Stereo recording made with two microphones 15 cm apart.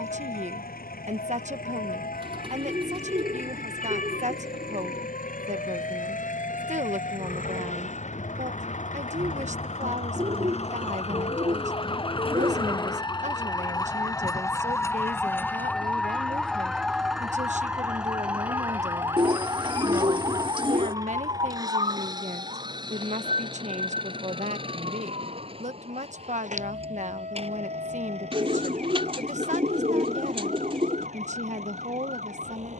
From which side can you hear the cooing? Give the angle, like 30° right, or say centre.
40° right.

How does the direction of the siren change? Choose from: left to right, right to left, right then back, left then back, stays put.
left to right.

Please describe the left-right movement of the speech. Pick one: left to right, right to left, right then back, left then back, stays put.
stays put.